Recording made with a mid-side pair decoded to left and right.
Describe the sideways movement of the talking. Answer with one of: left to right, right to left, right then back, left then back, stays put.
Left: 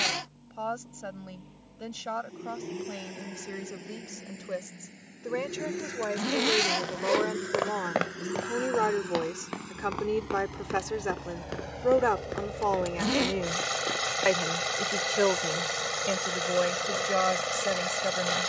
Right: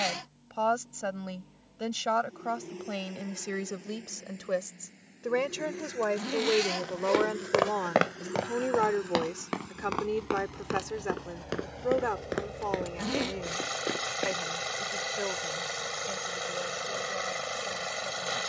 right to left.